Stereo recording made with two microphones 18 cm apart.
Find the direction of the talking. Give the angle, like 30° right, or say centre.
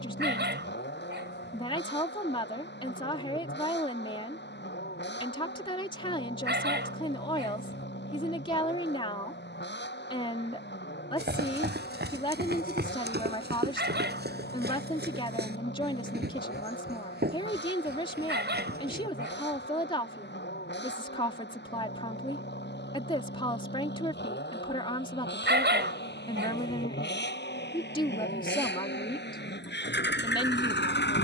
30° left.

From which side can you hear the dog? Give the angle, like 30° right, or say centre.
80° right.